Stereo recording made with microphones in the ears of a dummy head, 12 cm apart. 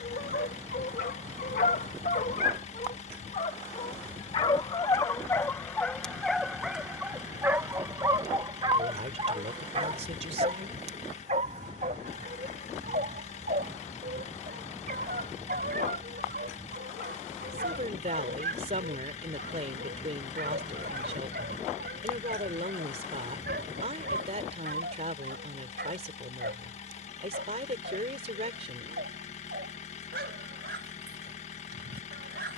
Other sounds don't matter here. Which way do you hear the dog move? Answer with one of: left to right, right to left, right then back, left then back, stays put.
left to right.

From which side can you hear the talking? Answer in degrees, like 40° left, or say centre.
50° right.